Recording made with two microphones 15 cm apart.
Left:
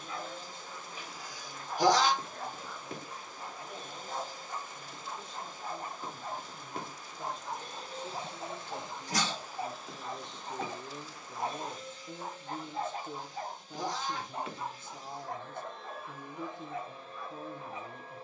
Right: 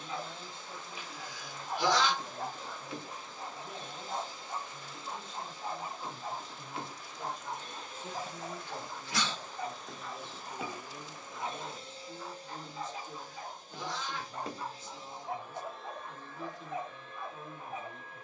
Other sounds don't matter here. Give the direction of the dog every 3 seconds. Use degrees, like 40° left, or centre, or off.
20° right, 20° right, centre, 30° left, 40° left, 20° right.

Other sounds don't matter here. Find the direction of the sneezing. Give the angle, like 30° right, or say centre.
40° left.